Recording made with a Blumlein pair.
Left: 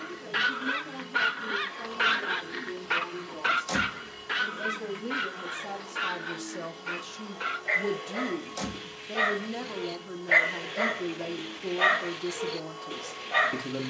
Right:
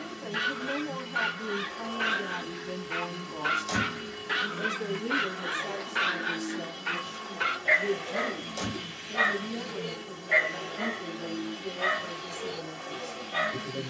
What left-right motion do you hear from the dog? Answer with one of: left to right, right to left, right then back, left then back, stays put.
right then back.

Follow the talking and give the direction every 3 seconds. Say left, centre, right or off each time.
right, centre, left, left, left.